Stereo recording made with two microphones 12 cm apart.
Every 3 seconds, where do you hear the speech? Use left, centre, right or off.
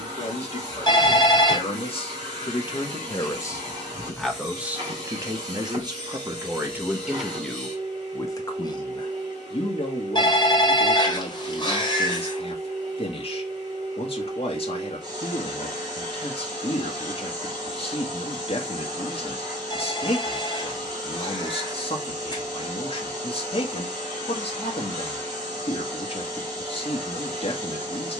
left, centre, centre, left, left, left, left, left, left, left.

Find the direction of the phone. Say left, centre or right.
left.